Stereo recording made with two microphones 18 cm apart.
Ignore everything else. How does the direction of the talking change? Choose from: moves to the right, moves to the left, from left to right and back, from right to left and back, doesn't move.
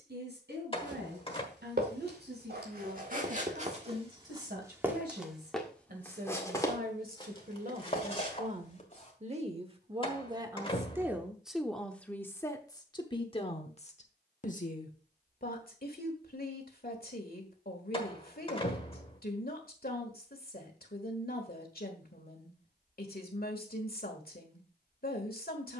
moves to the left.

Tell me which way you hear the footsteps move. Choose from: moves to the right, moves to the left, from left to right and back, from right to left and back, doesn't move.
moves to the left.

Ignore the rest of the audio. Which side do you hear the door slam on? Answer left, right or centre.
left.